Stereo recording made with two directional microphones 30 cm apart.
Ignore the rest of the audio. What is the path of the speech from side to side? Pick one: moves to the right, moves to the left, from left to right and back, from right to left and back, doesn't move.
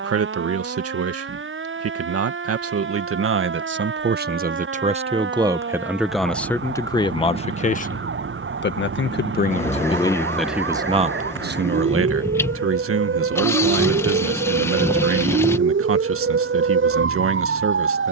from right to left and back.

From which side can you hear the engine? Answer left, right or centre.
centre.